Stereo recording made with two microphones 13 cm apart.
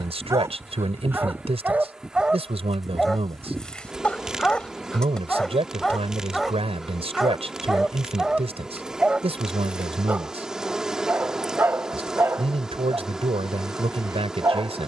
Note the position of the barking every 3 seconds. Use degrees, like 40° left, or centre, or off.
10° right, 10° left, centre, 10° right, 20° right.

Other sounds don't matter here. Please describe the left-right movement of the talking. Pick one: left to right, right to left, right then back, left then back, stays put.
stays put.